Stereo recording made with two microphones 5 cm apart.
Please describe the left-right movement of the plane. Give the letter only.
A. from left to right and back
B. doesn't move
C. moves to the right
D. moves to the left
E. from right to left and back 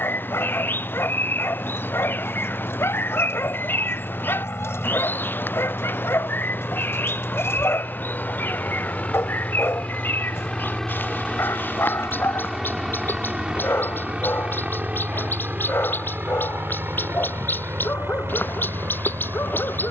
C.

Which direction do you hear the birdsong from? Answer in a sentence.
You can hear the birdsong on the left.